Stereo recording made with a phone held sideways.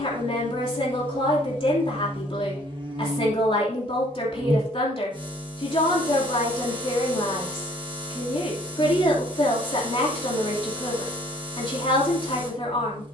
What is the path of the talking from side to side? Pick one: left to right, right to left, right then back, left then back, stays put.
stays put.